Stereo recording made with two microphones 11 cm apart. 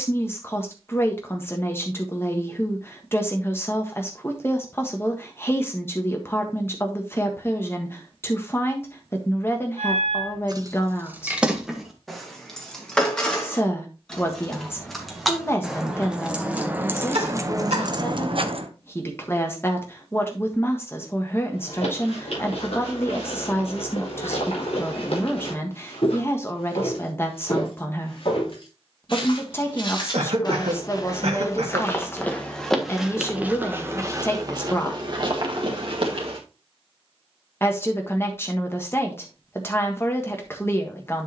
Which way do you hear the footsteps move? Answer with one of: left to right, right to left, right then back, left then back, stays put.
left to right.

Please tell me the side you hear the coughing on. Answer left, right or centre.
right.